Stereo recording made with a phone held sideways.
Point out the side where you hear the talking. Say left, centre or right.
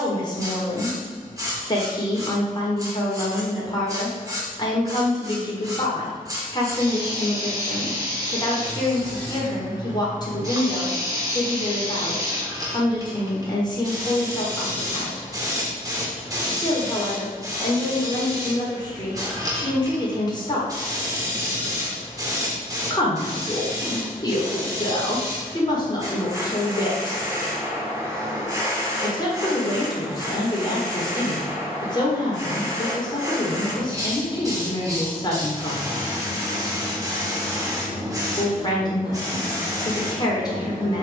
left.